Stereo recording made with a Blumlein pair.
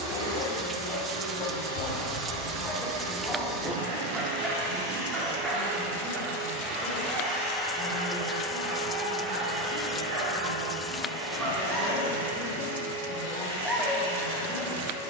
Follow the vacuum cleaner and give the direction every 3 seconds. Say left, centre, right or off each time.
right, right, centre, right, right.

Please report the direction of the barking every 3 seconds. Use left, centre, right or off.
left, centre, right, right, centre.